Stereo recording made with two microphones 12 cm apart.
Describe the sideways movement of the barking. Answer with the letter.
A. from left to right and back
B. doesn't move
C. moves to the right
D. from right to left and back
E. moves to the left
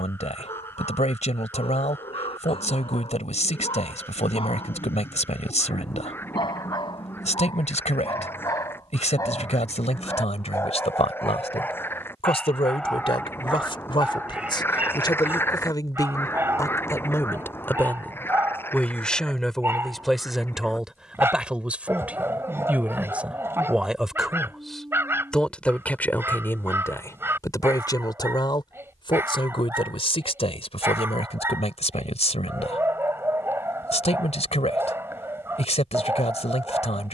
C.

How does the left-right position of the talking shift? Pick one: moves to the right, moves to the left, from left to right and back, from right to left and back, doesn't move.
from left to right and back.